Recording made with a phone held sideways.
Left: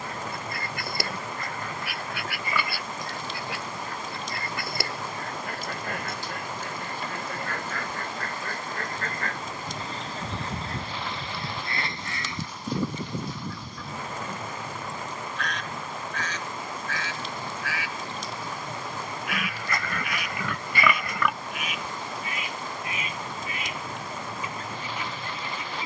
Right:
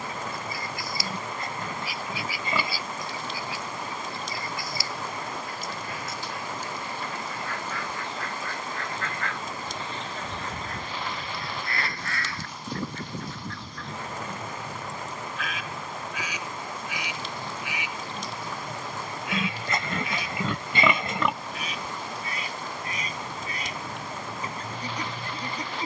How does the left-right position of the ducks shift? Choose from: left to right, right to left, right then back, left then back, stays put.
left to right.